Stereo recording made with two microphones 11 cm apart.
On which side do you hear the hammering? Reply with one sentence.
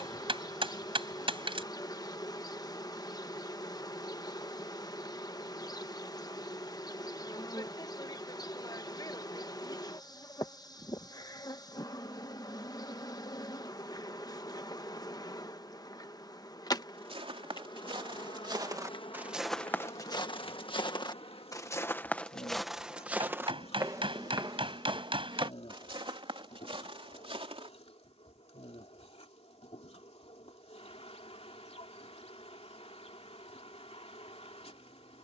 In this clip you hear the hammering on the right.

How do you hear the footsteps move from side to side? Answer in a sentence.
In this clip you hear the footsteps go left and come back.